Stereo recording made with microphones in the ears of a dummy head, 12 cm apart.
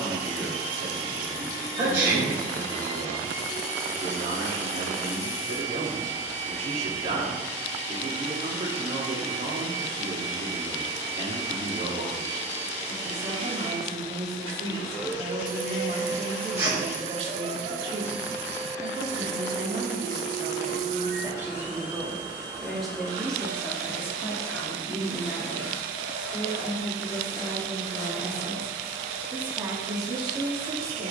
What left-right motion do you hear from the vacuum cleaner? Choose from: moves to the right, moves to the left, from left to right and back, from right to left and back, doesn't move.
doesn't move.